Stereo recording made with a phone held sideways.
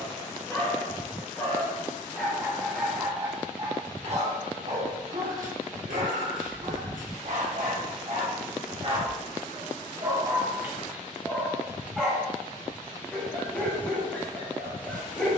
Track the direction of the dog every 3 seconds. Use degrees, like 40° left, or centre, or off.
10° left, 50° right, 60° right, 20° right, 10° left.